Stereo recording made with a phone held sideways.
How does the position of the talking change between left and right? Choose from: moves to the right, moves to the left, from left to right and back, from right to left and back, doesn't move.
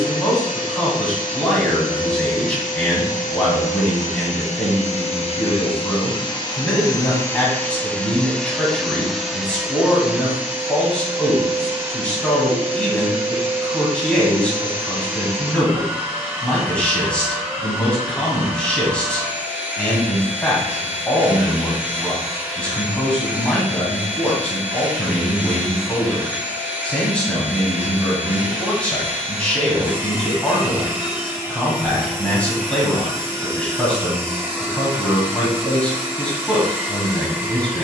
doesn't move.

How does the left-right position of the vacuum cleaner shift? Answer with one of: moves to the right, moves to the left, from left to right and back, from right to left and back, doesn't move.
moves to the right.